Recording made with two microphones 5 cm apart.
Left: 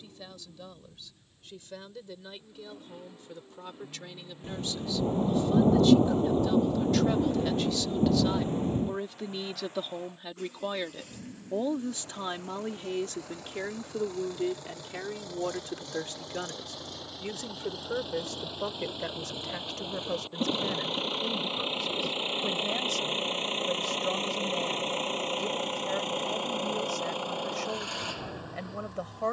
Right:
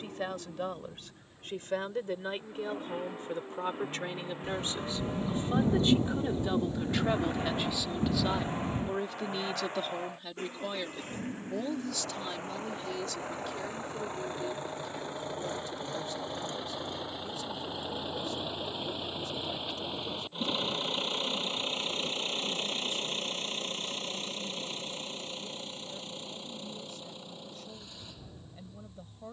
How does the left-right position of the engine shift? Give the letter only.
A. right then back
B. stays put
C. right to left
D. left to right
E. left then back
C.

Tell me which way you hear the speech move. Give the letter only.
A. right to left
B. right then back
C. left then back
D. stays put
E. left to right
A.